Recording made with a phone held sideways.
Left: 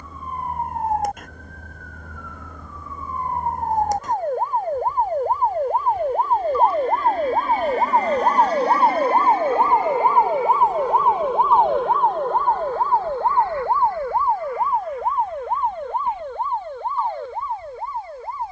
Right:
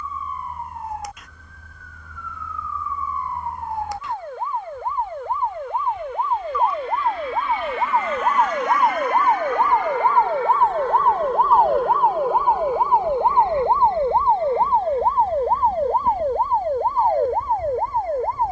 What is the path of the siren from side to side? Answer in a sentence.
You can hear the siren travel towards the right.